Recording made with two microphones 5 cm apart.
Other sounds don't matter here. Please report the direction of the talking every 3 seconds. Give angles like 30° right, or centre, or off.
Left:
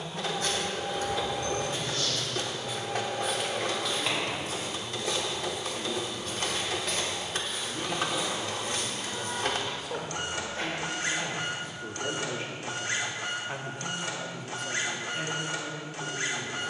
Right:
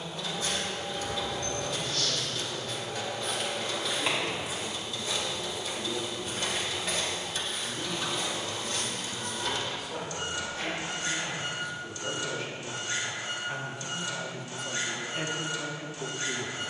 70° left, 70° left, 60° left, 50° left, 10° left, 30° right.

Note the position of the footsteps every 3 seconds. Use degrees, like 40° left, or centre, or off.
40° left, 10° right, centre, 50° left, off, off.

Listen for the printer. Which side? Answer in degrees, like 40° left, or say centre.
60° left.